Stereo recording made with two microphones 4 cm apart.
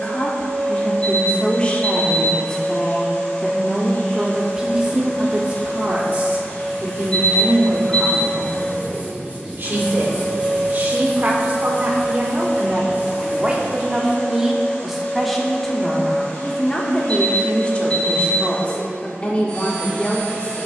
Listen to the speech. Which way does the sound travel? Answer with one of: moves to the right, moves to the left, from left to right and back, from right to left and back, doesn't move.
from left to right and back.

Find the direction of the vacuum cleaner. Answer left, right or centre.
left.